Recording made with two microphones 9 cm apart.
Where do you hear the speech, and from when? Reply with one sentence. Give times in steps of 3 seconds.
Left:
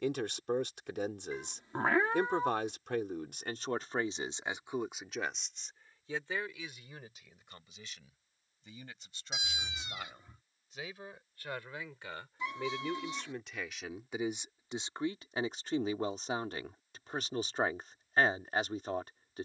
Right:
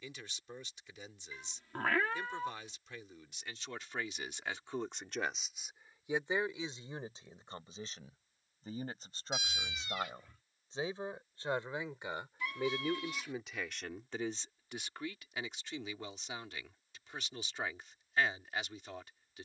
In this clip you hear the speech on the left from 0 s, on the right from 6 s, in the centre from 12 s and on the left from 15 s.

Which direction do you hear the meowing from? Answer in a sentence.
In this clip you hear the meowing on the left.